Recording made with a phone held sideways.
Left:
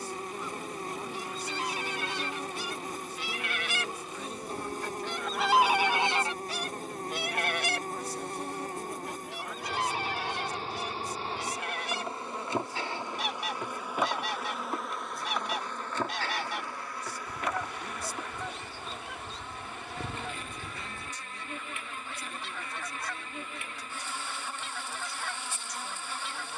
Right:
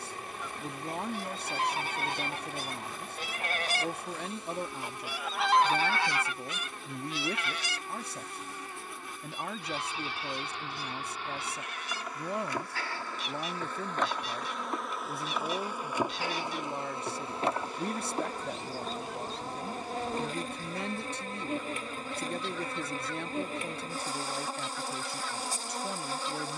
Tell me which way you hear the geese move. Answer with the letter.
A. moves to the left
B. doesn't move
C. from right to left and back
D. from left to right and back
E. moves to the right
A.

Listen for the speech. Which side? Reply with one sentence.
In this clip you hear the speech on the right.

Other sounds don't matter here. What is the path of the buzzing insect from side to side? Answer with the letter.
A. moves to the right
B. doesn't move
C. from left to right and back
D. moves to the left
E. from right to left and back
A.